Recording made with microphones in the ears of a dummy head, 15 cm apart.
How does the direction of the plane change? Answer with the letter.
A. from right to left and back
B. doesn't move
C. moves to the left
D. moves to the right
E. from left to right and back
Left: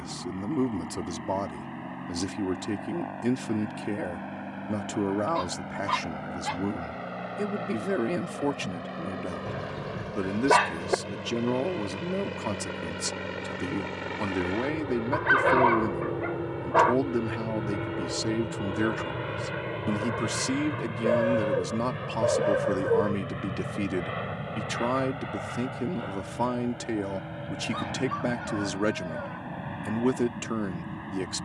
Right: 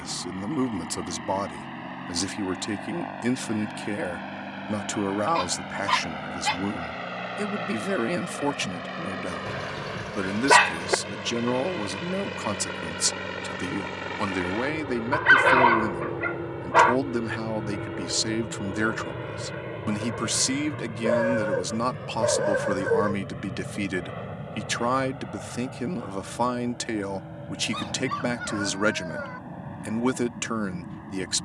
C.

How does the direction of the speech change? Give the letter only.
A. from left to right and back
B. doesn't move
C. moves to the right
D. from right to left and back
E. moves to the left
B.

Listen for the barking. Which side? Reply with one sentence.
In this clip you hear the barking on the right.